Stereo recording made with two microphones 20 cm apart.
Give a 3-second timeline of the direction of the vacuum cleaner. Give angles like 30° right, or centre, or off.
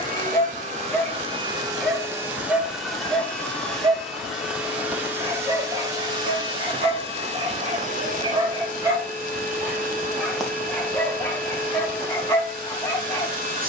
20° right, centre, 30° right, 40° right, 40° right.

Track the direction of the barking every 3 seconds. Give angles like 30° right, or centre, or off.
10° left, 20° right, 20° right, centre, 10° left.